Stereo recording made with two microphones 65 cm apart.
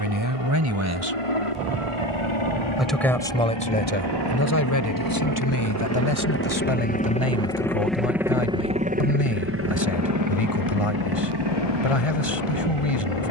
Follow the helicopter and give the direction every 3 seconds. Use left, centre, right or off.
left, left, centre, right, right.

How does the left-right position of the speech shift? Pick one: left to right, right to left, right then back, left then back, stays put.
right to left.